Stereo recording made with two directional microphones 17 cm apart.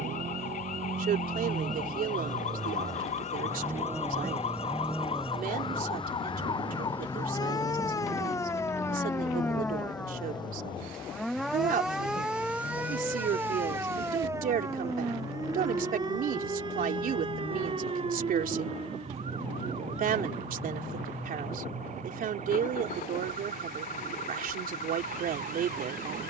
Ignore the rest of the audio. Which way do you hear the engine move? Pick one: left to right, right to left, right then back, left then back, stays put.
right to left.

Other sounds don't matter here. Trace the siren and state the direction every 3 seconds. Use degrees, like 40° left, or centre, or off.
50° left, 40° left, 20° left, 10° left, 10° right, 30° right, 40° right, 50° right, 50° right.